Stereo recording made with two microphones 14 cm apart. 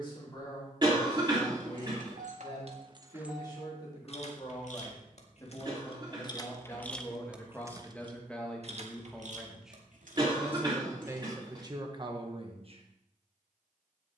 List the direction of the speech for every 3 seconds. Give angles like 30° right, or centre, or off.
30° left, 30° left, 10° left, 10° right, 40° right.